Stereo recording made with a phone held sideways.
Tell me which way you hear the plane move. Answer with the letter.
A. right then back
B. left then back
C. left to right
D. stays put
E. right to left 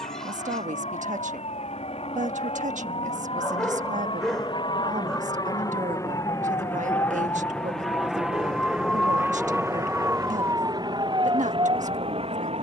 C.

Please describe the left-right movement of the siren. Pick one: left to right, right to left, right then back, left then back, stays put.
left to right.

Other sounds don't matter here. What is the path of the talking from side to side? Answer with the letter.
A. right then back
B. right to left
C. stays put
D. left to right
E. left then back
C.